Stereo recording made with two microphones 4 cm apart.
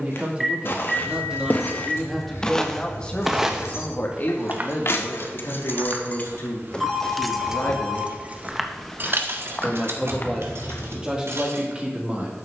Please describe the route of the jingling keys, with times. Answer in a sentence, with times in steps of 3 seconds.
In this clip you hear the jingling keys on the left from 0 s, in the centre from 6 s and on the right from 9 s.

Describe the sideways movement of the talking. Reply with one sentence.
You can hear the talking move from right to left and back again.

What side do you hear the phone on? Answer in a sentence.
You can hear the phone in the centre.